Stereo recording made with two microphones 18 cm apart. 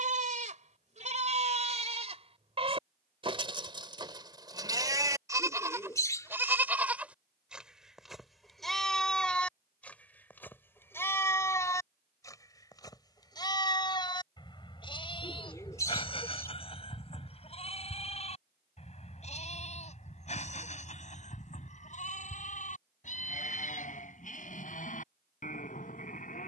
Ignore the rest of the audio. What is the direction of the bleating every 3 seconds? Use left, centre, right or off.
right, right, centre, centre, left, left, left, left, left.